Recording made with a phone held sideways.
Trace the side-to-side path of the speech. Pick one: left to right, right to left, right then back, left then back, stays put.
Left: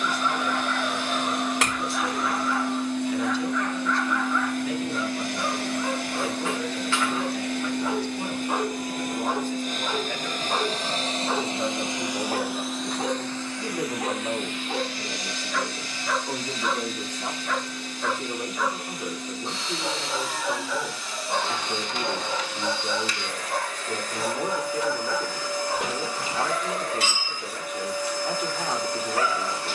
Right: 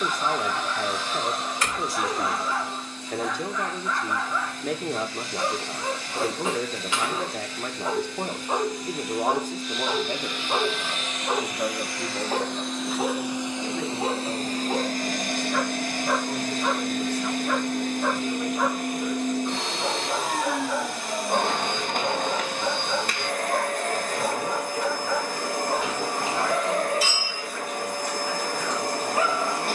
right to left.